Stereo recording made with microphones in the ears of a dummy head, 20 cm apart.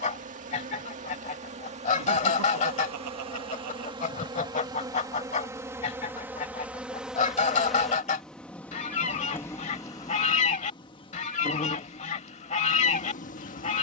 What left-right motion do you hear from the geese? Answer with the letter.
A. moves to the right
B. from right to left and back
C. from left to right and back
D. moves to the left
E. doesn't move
E.